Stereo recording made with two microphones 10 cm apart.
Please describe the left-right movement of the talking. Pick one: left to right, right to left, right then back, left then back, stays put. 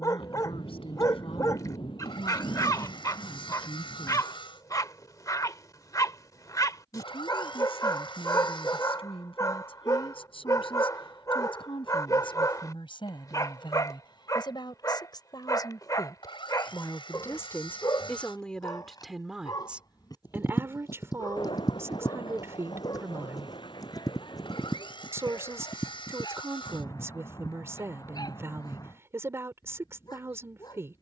left to right.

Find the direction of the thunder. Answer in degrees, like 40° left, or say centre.
60° left.